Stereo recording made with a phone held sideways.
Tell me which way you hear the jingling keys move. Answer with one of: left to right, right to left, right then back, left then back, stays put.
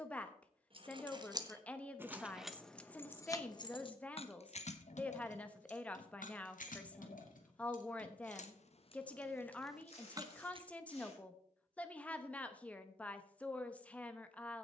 left then back.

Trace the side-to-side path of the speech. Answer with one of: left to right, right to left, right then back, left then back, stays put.
stays put.